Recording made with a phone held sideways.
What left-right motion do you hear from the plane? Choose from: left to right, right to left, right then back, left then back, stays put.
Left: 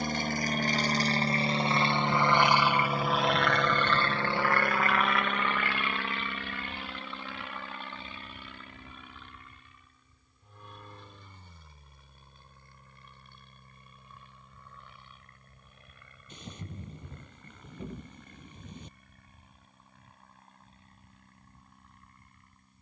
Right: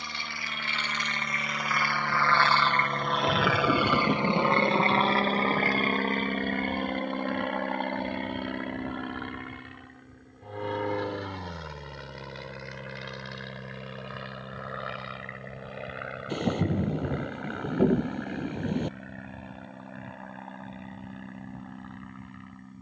left to right.